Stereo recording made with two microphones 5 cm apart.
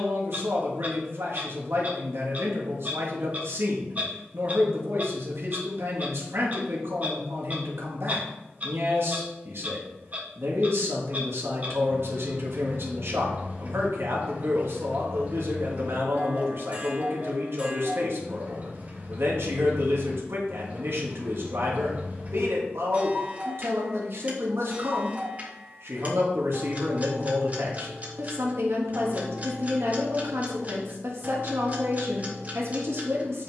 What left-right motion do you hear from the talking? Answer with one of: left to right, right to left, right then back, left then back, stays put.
stays put.